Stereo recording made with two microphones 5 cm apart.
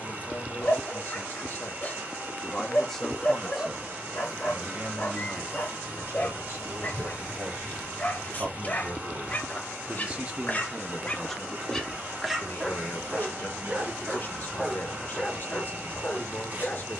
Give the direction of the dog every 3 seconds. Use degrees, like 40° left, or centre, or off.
30° left, 30° left, 30° left, 30° left, 10° right, 20° left.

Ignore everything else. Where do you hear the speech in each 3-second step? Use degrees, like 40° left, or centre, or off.
40° left, 30° right, 60° right, 10° right, 40° left, 40° left.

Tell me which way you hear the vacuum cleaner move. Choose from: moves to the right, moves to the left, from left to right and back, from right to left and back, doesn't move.
doesn't move.